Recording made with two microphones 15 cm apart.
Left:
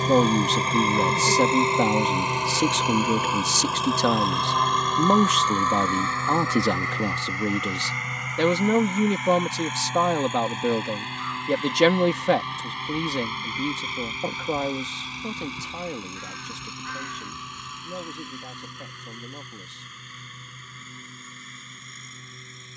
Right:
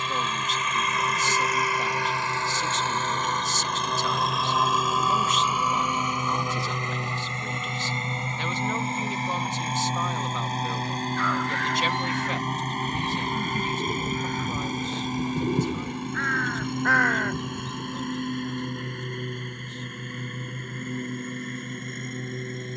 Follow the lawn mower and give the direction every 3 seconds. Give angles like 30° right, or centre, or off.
30° left, centre, 20° right, 40° right, 40° right, 50° right, 50° right, 60° right.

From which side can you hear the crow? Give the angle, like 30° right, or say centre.
70° right.